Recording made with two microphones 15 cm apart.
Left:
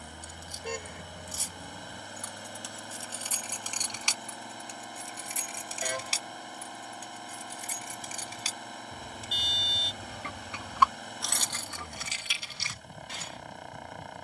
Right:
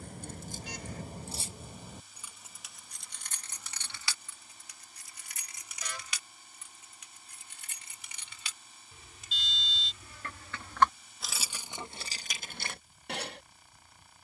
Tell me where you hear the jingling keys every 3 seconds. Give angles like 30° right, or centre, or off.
30° right, 20° left, 40° left, 10° left, 50° right.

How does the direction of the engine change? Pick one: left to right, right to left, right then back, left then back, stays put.
stays put.